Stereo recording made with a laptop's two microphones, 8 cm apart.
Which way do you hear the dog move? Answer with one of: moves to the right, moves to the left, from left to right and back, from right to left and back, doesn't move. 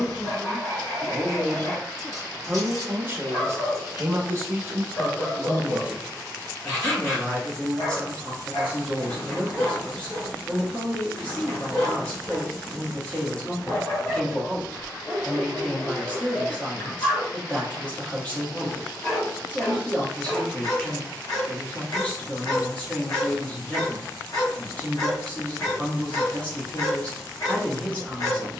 doesn't move.